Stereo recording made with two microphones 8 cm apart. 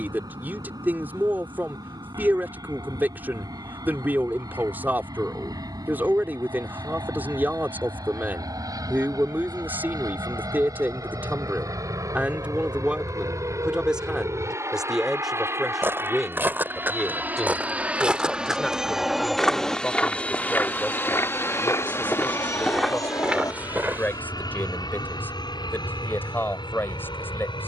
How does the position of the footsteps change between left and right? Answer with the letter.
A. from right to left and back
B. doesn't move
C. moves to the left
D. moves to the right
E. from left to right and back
A.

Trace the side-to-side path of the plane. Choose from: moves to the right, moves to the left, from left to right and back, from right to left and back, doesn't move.
moves to the left.